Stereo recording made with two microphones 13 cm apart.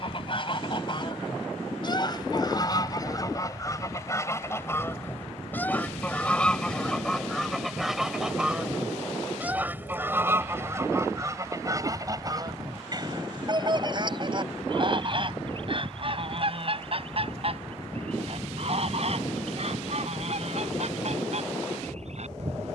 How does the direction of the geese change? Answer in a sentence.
You can hear the geese travel towards the right.